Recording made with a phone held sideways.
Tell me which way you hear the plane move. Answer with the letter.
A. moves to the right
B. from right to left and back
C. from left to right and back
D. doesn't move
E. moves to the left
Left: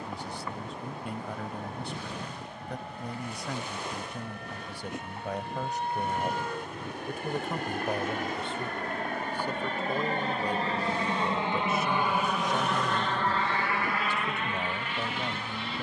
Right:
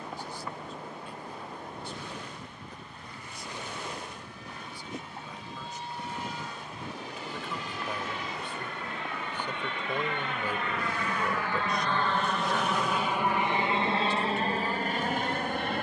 A.